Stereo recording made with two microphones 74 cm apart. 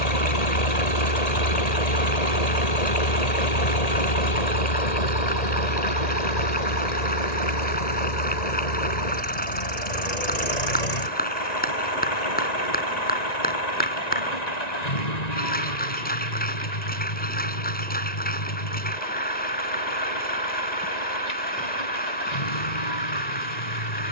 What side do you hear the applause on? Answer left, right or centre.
centre.